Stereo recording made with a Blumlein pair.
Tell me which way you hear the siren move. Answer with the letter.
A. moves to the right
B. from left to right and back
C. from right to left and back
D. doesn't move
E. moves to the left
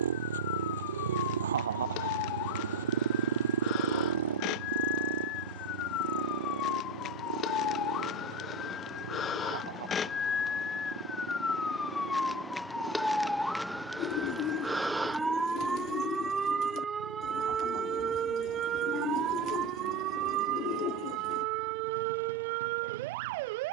A.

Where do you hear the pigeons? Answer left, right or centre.
left.